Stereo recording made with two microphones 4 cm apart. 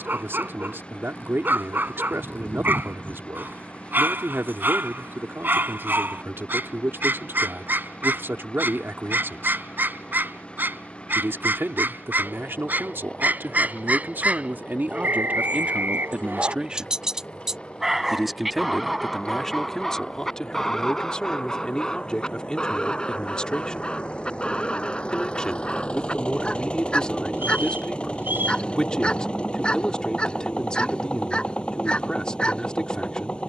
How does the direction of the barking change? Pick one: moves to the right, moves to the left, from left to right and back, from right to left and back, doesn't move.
moves to the left.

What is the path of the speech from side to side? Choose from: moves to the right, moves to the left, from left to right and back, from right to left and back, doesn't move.
moves to the left.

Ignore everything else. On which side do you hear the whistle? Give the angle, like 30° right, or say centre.
50° right.